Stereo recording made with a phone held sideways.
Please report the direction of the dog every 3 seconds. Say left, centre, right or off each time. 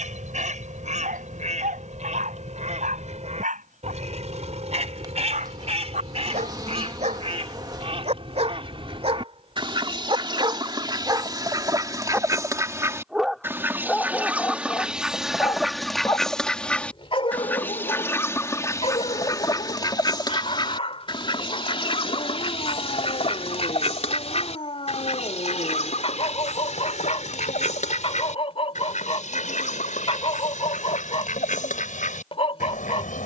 right, right, right, right, centre, left, left, left, left, left, left.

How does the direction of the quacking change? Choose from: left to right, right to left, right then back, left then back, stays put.
right to left.